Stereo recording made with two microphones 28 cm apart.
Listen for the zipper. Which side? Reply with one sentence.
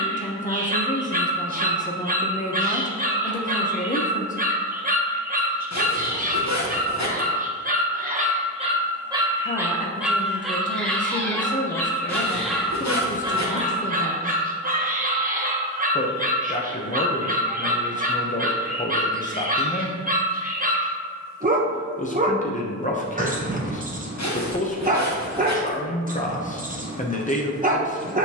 In this clip you hear the zipper on the left.